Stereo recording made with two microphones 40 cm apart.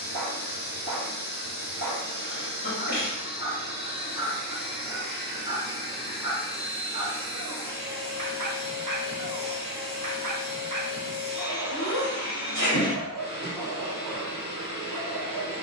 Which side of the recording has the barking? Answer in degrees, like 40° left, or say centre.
50° right.